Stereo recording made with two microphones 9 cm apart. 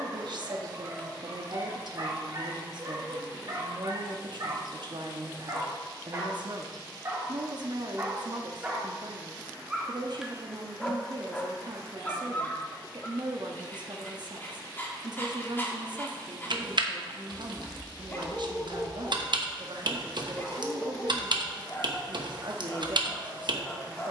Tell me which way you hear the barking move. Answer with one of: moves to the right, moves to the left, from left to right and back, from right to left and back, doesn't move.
moves to the left.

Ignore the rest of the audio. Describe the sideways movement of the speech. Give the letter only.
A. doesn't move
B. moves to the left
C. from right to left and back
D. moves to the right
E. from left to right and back
A.